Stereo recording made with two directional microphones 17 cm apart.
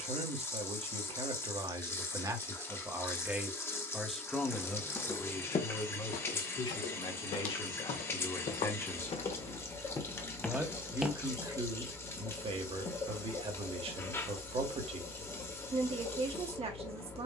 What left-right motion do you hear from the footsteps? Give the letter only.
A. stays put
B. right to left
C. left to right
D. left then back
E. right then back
D.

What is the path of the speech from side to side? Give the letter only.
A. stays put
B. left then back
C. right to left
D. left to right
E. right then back
B.